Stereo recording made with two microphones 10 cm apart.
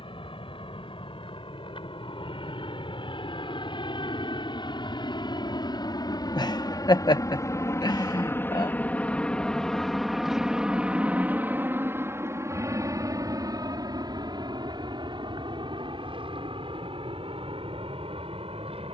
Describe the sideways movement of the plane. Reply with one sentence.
You can hear the plane move from left to right.